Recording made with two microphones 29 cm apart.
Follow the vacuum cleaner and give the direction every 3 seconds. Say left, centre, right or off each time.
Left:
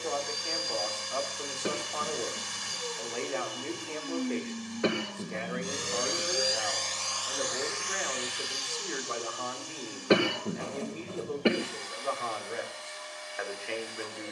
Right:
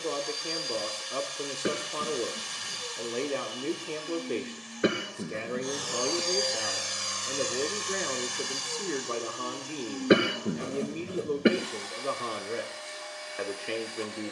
left, left, right, right, right.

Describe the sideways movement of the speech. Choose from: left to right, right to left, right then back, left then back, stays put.
stays put.